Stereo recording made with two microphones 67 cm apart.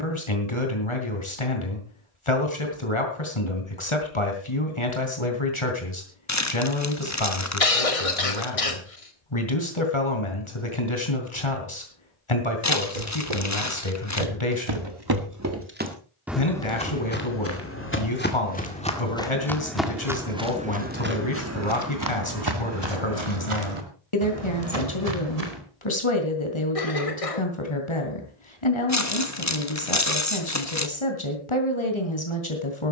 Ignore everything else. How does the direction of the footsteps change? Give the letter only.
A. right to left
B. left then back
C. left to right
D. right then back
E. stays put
B.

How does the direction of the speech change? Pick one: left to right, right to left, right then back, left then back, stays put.
stays put.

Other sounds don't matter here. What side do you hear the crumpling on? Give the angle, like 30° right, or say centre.
20° left.